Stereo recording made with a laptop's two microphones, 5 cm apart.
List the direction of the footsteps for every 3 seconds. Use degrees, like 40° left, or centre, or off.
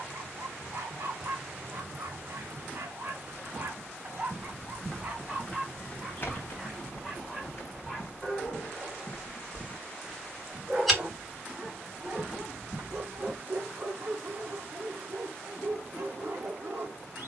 off, centre, 50° left, 10° left, 20° right, off.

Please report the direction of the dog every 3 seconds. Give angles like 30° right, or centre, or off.
60° right, 30° right, centre, 20° right, 50° right, 60° right.